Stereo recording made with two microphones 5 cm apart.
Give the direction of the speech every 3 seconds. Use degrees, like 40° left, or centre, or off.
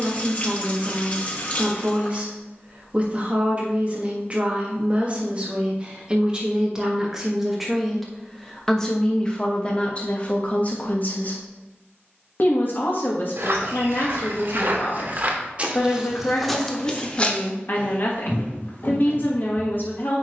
30° right, 30° right, centre, 30° left, 50° left, 50° left, 50° left.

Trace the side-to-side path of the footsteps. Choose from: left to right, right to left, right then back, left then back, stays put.
right to left.